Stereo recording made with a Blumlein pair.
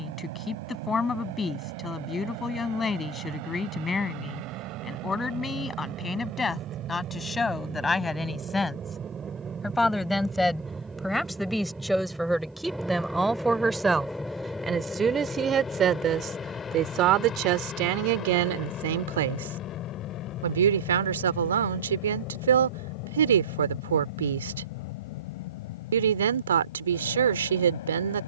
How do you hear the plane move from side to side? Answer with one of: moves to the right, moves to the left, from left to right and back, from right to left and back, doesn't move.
moves to the left.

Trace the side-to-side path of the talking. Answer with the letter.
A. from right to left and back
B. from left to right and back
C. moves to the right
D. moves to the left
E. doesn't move
C.